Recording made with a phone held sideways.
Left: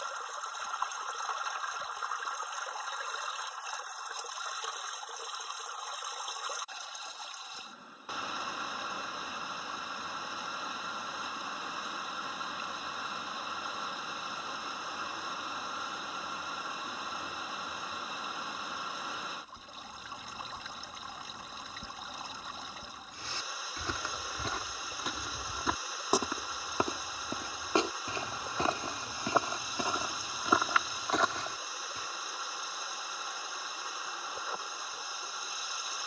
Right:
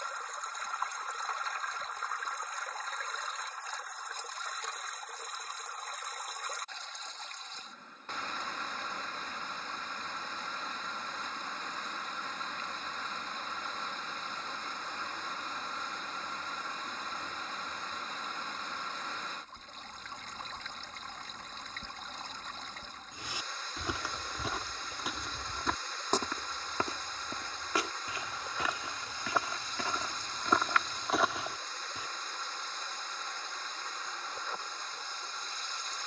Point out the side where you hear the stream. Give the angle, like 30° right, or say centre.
10° left.